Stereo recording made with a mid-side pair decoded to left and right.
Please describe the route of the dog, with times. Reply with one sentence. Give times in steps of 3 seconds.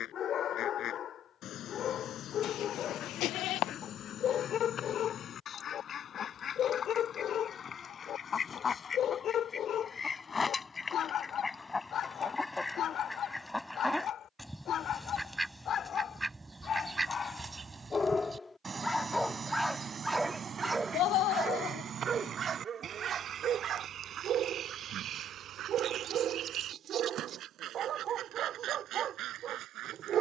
In this clip you hear the dog on the left from 0 s, in the centre from 18 s and on the right from 21 s.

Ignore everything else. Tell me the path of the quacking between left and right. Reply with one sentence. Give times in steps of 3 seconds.
In this clip you hear the quacking on the left from 0 s, in the centre from 12 s and on the right from 18 s.